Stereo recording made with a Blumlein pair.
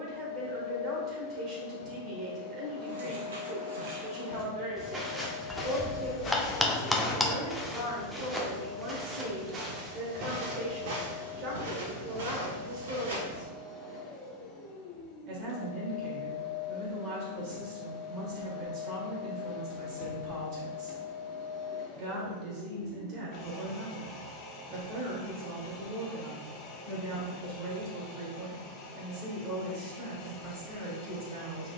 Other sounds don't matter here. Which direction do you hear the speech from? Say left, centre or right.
right.